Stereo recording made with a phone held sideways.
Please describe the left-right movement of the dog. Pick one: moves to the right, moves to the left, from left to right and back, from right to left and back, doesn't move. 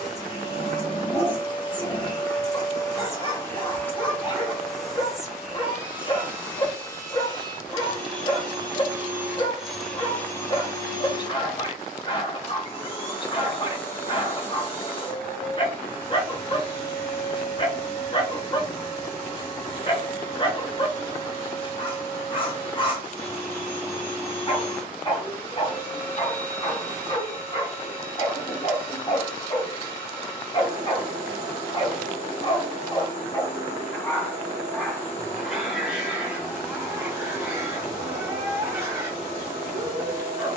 moves to the right.